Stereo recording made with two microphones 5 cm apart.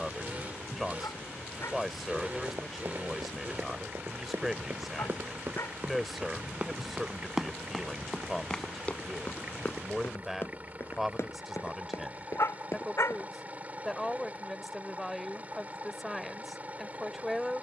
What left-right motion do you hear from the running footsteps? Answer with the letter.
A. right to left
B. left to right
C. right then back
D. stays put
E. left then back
A.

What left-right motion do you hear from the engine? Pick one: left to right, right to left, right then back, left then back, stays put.
stays put.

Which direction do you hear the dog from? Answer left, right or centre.
left.